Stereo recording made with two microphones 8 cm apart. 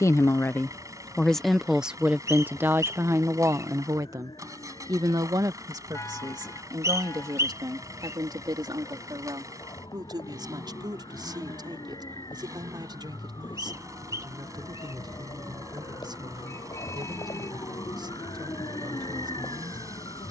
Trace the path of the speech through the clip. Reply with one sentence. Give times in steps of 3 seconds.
In this clip you hear the speech in the centre from 0 s and on the right from 3 s.